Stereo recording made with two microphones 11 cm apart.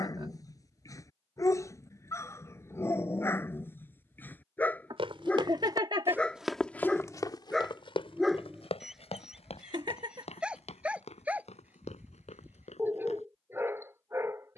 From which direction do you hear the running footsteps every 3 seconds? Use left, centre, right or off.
off, right, left, left, left.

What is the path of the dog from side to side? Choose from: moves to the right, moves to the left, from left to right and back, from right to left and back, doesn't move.
moves to the right.